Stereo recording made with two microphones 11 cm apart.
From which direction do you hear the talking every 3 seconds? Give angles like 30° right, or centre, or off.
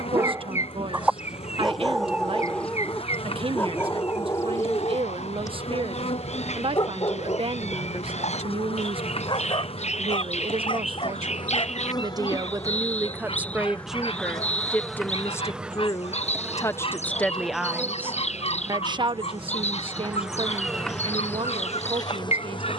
50° right, 50° right, 50° right, 50° right, 10° right, 20° left, 50° right, 50° right.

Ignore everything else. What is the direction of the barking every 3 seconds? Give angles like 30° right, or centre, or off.
centre, 30° left, 40° left, 50° left, 50° left, 60° left, 60° left, 60° left.